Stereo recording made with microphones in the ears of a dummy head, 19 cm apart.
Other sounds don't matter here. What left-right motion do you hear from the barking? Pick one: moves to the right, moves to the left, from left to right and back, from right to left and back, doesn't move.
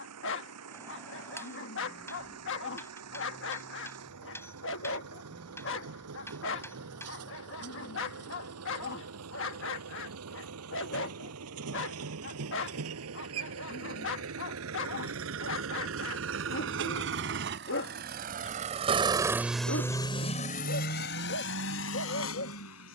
doesn't move.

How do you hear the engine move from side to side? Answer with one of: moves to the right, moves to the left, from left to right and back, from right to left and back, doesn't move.
moves to the left.